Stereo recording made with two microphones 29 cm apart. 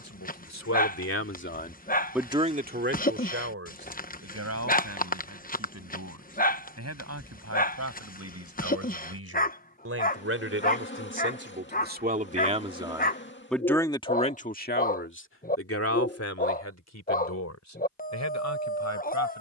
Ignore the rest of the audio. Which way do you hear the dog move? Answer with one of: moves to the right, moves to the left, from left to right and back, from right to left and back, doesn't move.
doesn't move.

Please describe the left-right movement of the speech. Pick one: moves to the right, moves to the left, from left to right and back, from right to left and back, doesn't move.
from left to right and back.